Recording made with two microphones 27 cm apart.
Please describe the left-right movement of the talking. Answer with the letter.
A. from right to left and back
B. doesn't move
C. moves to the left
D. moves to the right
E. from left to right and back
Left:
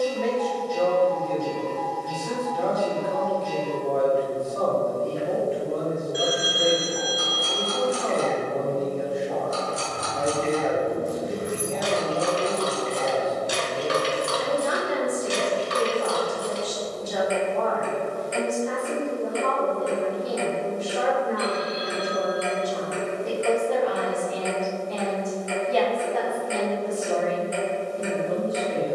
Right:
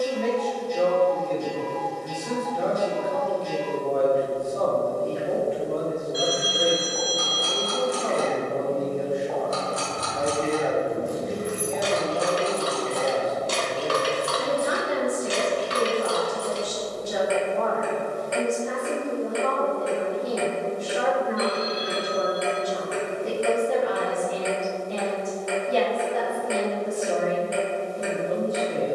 B.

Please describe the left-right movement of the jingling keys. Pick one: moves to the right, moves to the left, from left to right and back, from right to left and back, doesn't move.
moves to the left.